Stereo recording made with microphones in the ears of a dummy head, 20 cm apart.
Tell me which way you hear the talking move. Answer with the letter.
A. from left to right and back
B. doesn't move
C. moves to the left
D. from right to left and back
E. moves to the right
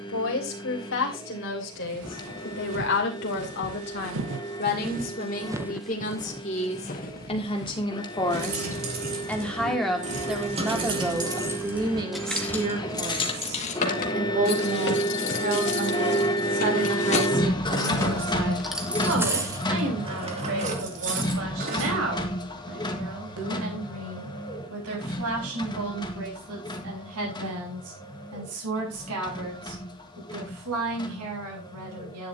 E.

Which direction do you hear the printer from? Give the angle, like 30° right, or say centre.
20° left.